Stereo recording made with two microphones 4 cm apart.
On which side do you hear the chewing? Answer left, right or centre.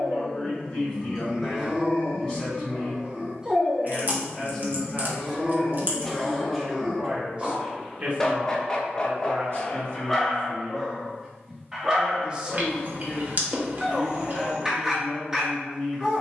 right.